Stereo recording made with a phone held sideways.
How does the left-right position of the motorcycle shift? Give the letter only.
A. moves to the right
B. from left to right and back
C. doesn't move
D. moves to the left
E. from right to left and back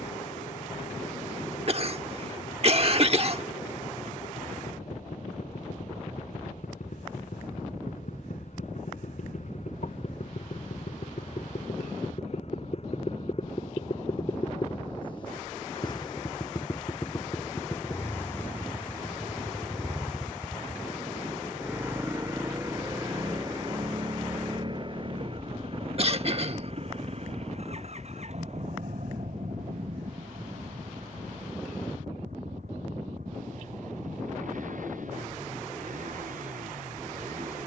A.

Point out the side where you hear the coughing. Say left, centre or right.
right.